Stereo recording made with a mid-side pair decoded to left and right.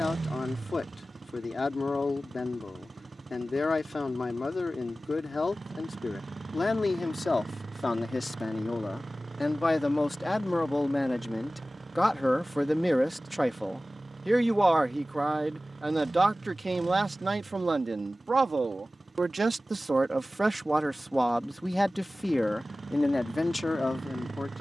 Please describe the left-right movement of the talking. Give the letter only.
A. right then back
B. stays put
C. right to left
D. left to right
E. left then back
A.